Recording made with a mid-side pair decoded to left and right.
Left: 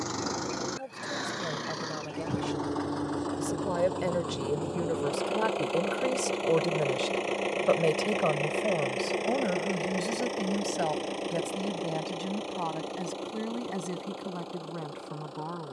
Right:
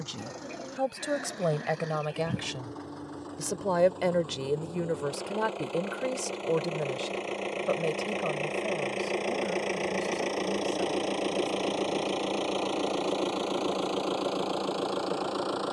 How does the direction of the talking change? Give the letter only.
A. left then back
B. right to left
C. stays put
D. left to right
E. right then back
B.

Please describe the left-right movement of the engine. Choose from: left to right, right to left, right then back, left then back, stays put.
left to right.